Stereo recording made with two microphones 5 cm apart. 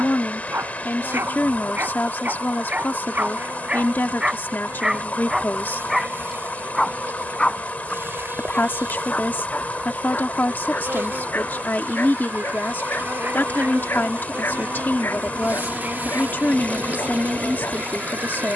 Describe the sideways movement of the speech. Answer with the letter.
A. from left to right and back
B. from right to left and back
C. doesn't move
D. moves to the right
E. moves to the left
C.